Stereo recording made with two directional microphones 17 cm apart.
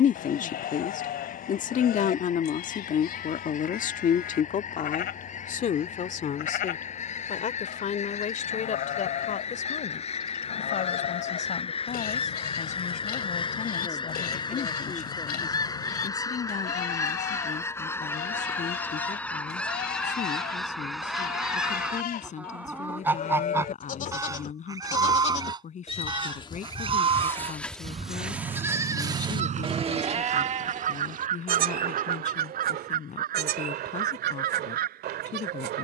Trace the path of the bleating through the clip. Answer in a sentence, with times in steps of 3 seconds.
In this clip you hear the bleating on the left from 0 s, in the centre from 27 s and on the right from 30 s.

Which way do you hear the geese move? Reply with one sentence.
You can hear the geese travel towards the right.